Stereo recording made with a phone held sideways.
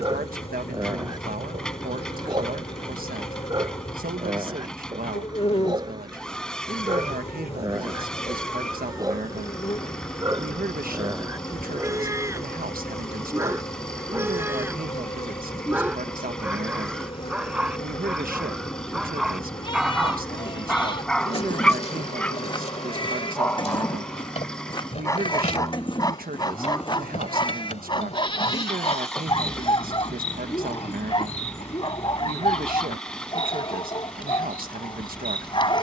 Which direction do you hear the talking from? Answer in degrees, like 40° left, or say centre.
80° right.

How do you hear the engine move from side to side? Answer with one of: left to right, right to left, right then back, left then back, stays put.
stays put.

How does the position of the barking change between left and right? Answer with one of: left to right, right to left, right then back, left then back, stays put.
right to left.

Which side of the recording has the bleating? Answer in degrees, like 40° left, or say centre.
30° left.